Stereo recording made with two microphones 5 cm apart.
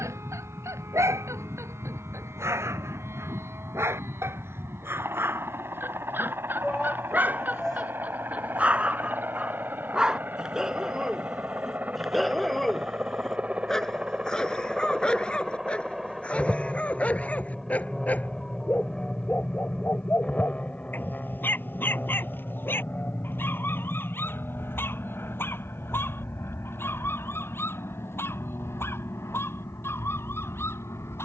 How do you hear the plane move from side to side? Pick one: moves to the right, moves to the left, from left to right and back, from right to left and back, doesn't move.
moves to the left.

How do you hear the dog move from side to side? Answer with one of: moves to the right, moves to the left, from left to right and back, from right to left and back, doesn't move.
moves to the left.